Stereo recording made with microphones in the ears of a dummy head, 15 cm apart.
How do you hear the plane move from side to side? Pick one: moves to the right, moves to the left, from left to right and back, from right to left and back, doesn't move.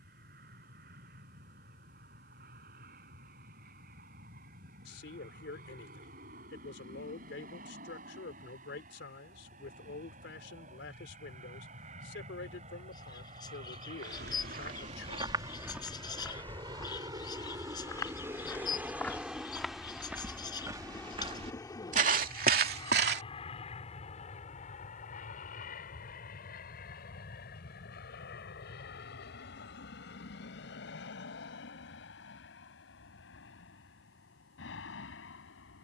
moves to the left.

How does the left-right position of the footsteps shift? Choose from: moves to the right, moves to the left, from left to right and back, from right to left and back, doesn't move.
from right to left and back.